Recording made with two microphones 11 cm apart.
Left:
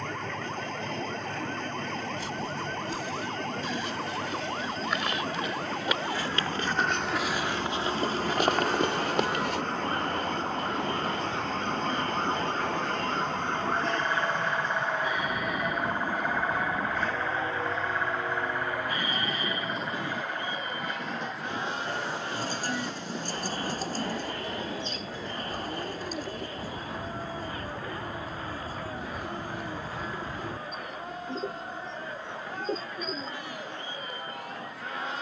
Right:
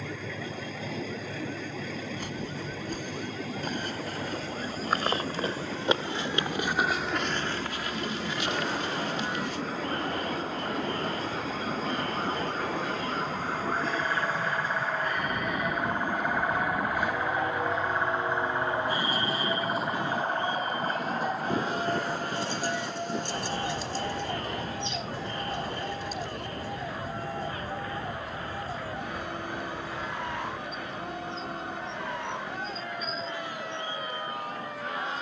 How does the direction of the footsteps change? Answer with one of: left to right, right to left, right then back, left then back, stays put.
right to left.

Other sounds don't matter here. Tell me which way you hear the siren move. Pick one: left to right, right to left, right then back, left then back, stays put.
left to right.